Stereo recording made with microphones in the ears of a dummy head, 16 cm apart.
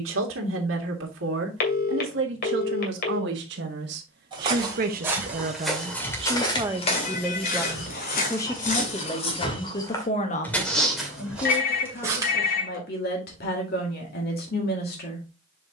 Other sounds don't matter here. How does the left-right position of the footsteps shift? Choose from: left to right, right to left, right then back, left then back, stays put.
left then back.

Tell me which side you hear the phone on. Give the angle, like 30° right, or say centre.
60° left.